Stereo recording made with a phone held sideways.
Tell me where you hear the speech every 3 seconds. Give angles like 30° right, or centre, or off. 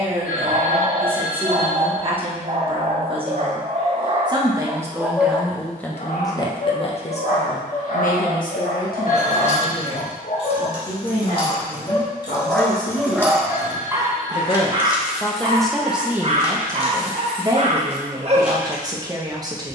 40° right, 20° right, 50° left, 70° left, 50° left, 10° right, 20° right.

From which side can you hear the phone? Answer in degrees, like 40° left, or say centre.
60° left.